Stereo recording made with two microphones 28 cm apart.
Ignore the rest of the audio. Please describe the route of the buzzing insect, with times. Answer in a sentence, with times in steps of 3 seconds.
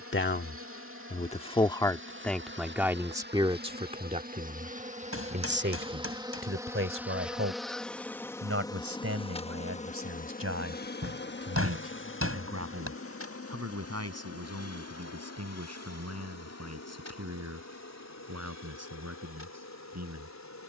You can hear the buzzing insect on the right from 0 s, in the centre from 6 s and on the left from 9 s.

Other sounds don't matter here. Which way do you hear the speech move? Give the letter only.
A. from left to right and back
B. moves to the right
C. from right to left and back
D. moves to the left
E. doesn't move
B.